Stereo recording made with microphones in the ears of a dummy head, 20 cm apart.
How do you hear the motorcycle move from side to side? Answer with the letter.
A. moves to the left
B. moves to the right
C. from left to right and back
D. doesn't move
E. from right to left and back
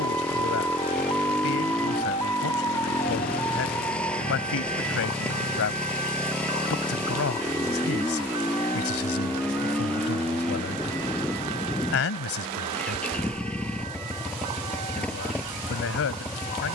D.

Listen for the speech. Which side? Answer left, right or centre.
left.